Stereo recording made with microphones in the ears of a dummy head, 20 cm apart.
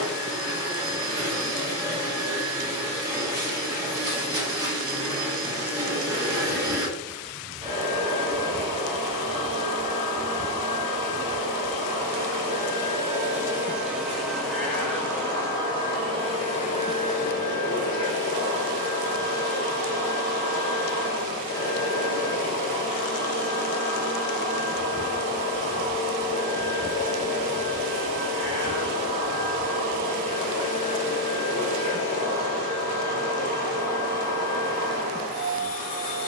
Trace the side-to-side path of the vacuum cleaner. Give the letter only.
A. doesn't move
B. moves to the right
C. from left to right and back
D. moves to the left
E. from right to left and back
D.